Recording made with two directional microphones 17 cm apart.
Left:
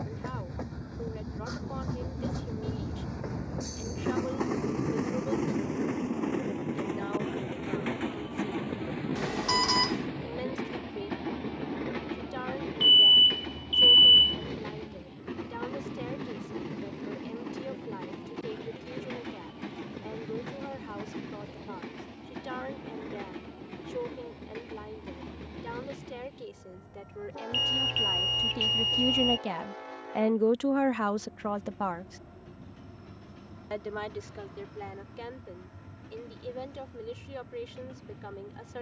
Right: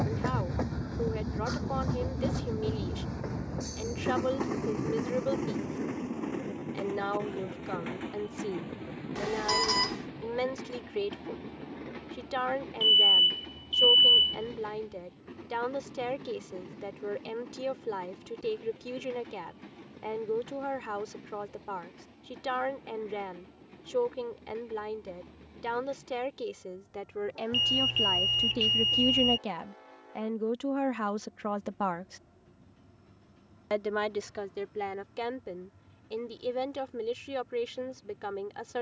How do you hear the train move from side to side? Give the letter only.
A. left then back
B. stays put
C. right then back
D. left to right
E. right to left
E.